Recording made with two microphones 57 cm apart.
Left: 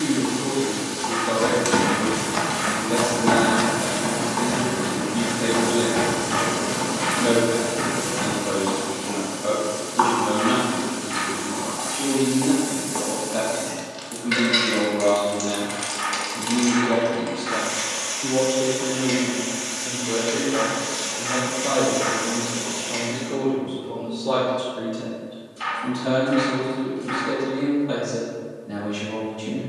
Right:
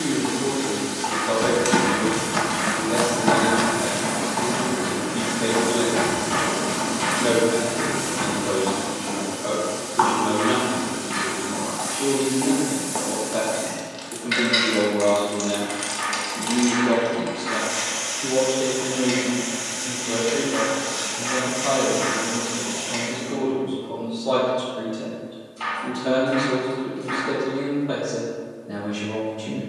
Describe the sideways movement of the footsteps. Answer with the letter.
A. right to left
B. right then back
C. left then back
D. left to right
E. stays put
A.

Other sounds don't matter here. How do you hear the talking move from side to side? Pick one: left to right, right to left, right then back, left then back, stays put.
right then back.